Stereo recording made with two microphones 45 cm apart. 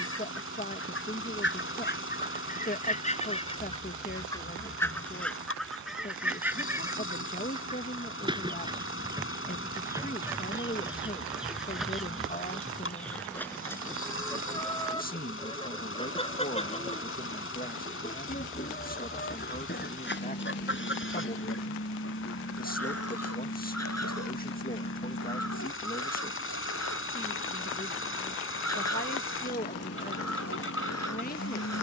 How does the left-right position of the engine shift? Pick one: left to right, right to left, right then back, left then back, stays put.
stays put.